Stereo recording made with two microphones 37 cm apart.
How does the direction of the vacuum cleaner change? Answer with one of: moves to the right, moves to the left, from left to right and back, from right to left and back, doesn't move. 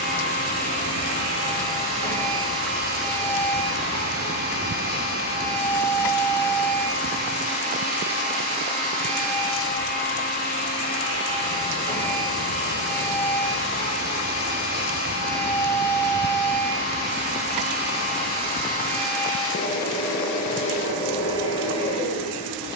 doesn't move.